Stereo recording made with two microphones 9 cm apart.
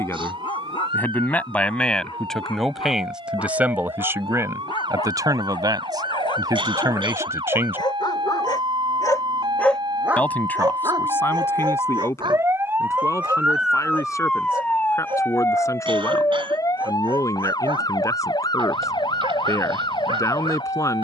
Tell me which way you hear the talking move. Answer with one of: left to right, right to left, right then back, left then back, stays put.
right then back.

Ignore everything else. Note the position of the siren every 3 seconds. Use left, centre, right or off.
right, right, right, right, centre, left, left.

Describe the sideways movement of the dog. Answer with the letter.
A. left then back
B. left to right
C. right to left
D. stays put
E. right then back
B.